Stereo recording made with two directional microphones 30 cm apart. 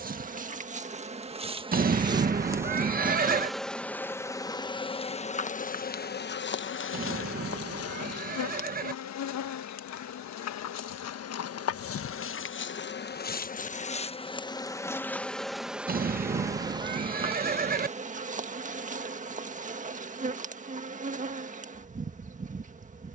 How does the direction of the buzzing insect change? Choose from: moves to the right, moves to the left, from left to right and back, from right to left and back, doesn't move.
from right to left and back.